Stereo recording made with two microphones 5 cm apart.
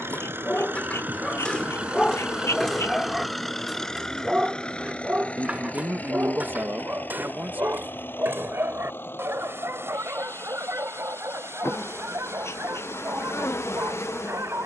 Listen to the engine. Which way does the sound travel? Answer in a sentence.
In this clip you hear the engine travel towards the left.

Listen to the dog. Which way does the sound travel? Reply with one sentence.
You can hear the dog move to the right.